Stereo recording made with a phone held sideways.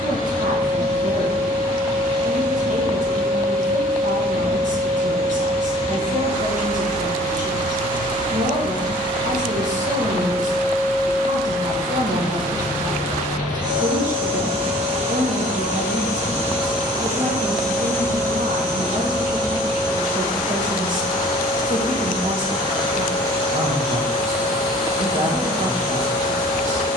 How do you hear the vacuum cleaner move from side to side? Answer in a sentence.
In this clip you hear the vacuum cleaner move from left to right and back again.